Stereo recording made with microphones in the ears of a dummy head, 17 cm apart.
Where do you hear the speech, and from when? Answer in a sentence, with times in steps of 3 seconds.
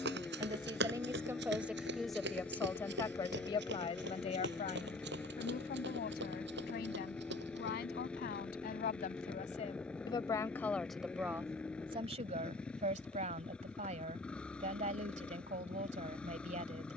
You can hear the speech in the centre from 0 s, on the left from 3 s, in the centre from 9 s and on the right from 12 s.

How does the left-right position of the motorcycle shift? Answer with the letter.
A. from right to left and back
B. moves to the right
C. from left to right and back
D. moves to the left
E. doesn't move
E.